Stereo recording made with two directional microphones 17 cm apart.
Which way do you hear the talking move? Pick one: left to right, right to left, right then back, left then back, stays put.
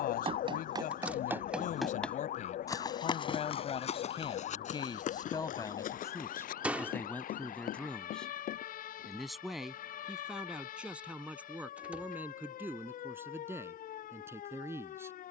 left to right.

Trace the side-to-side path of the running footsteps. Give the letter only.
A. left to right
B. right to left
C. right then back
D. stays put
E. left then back
B.